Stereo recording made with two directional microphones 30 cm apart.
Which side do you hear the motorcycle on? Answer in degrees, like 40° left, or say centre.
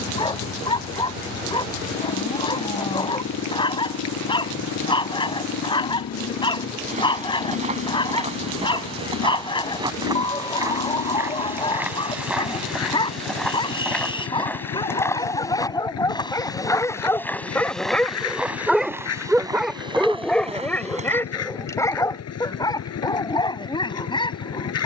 60° left.